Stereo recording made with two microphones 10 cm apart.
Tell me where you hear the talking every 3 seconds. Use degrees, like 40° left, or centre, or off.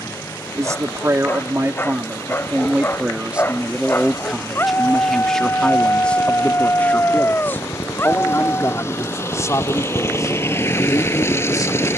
30° right, centre, 20° left, 40° left.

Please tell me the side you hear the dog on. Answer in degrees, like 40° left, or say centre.
30° left.